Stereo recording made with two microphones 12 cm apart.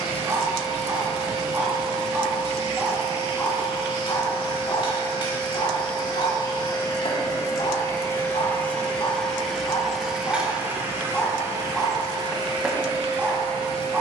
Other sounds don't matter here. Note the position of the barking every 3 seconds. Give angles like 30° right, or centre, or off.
20° right, 40° left, 50° left, 20° left, 10° right.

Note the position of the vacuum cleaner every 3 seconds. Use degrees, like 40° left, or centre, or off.
60° left, 50° left, 30° left, 10° right, 40° right.